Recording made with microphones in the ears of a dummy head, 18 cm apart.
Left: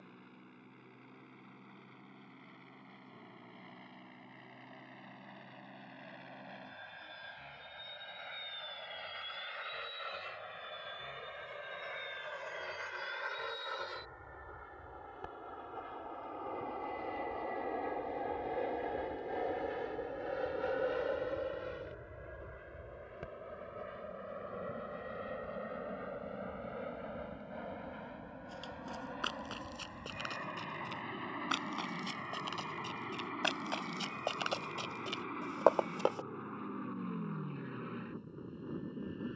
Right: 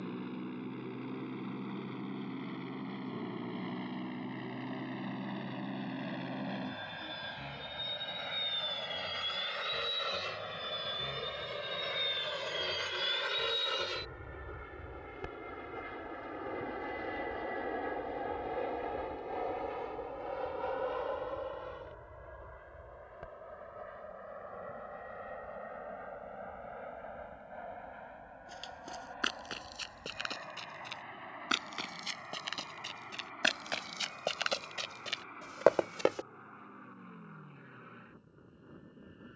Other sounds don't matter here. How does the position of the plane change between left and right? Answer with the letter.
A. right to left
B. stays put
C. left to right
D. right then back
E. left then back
A.